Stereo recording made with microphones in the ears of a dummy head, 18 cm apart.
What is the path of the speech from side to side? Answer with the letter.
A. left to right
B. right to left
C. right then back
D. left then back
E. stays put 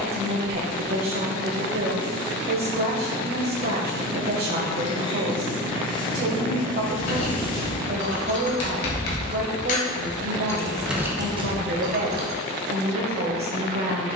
E.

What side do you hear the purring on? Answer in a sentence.
In this clip you hear the purring on the left.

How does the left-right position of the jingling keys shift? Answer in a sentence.
In this clip you hear the jingling keys move from left to right.